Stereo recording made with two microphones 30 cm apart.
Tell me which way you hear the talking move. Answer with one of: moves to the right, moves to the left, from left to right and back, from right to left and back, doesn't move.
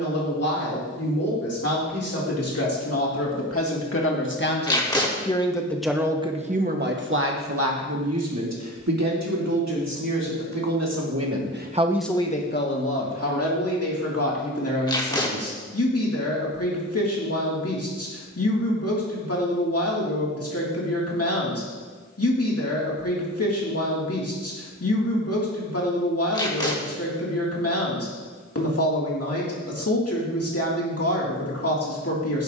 from left to right and back.